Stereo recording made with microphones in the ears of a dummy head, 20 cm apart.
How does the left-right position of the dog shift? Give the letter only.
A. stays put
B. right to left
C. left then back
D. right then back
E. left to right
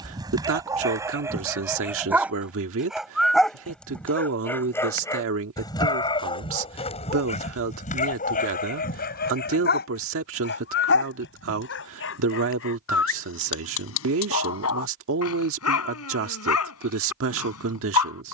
B.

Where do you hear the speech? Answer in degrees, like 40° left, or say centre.
60° right.